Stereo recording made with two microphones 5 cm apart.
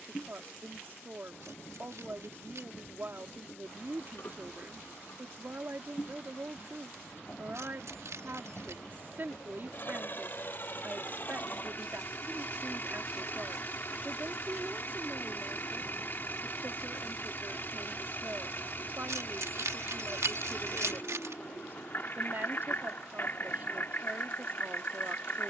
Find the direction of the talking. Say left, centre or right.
right.